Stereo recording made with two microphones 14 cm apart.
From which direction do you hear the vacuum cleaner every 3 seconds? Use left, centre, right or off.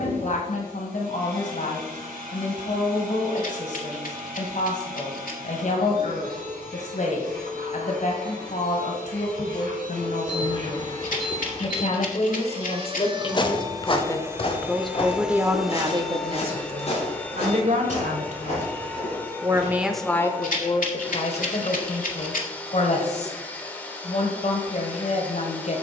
right, right, right, right, right, centre, centre, centre, centre.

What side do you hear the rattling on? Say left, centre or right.
left.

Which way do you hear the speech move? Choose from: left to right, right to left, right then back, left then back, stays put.
right then back.